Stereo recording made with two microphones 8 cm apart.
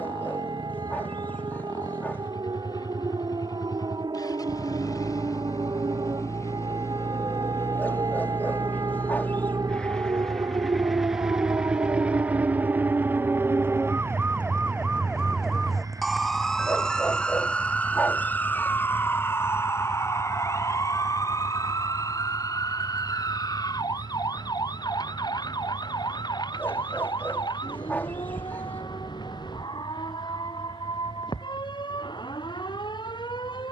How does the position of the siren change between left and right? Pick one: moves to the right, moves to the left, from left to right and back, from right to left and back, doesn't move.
moves to the left.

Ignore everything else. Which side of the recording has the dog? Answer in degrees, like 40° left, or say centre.
20° left.